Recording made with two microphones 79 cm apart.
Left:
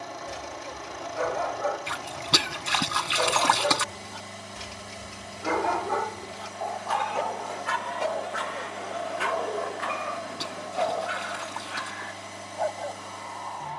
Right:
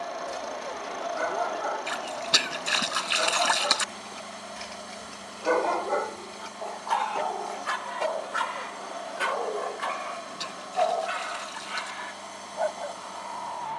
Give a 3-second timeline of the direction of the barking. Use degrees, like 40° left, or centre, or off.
80° left, 60° left, 10° left, 30° right, 40° right.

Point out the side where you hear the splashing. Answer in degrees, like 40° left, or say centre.
70° left.